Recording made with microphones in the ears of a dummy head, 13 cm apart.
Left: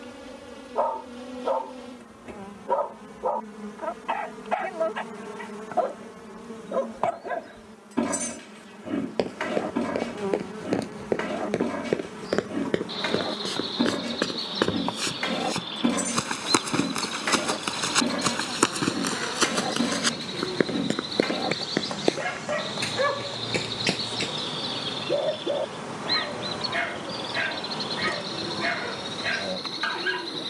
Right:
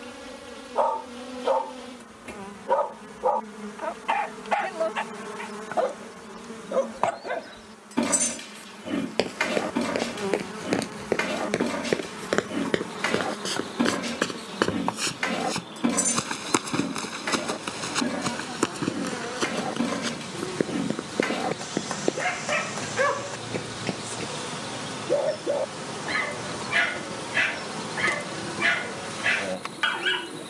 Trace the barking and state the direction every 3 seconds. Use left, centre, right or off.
right, right, right, right, right, centre, centre, right, right, right.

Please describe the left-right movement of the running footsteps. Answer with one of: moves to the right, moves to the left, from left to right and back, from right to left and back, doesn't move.
moves to the left.